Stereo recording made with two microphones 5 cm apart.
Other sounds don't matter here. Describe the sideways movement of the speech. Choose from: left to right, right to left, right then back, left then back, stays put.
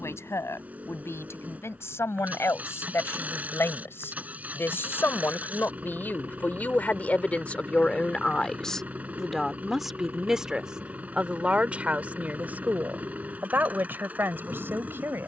left to right.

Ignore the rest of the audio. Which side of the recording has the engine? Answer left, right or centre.
right.